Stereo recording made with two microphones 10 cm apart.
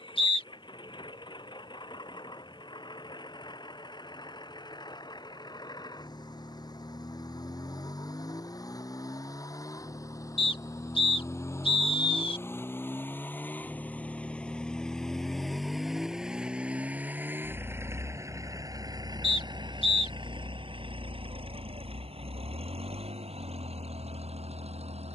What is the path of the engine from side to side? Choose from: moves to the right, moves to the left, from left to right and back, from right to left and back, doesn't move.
moves to the right.